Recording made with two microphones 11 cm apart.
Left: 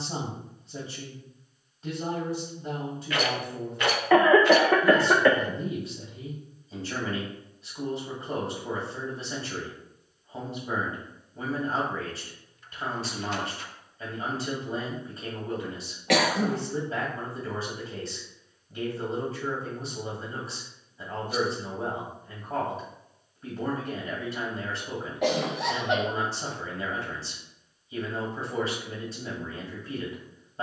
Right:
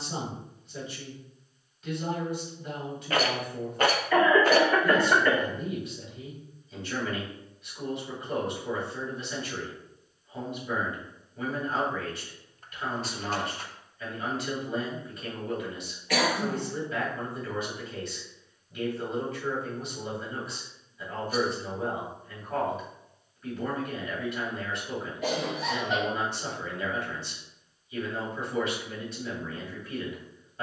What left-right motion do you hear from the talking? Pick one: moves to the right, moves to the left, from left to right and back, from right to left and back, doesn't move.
doesn't move.